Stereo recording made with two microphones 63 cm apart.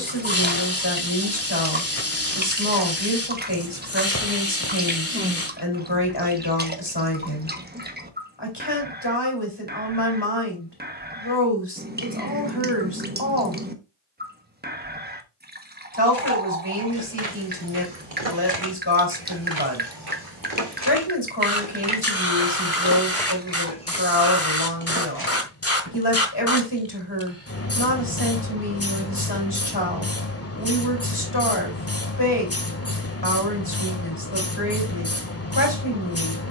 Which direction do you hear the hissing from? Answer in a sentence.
You can hear the hissing on the left.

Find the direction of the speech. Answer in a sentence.
You can hear the speech on the left.